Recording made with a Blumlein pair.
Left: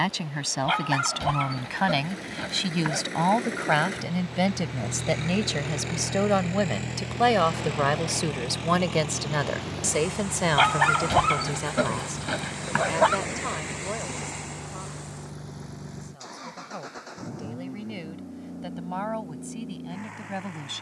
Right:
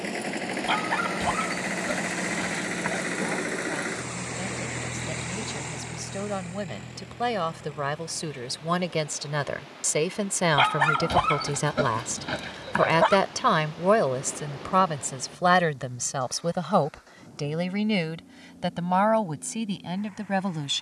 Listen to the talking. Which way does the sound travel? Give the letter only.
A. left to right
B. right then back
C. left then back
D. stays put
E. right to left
A.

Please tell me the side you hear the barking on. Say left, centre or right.
centre.